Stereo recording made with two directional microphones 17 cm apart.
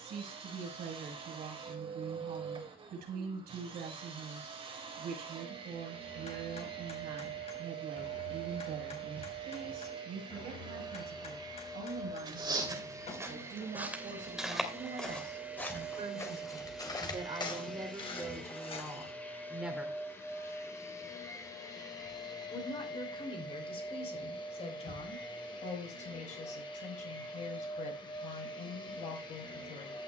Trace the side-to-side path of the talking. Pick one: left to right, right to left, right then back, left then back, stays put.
right to left.